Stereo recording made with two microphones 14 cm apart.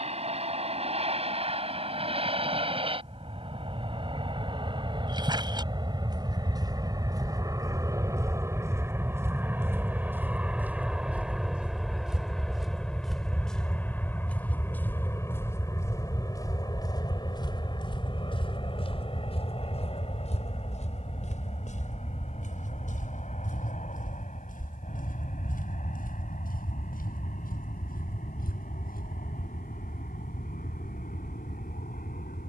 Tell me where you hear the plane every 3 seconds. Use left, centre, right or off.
right, right, right, centre, centre, left, left, left, left, left, left.